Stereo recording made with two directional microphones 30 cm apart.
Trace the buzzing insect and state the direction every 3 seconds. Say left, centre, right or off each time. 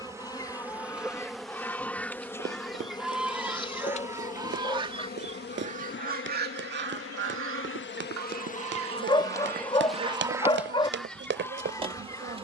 centre, left, left, centre.